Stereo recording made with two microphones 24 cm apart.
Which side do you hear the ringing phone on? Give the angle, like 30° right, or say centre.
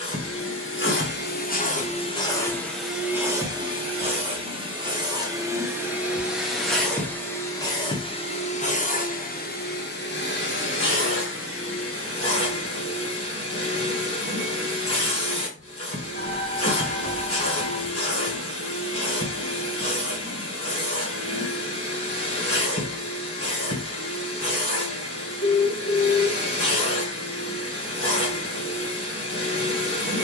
50° left.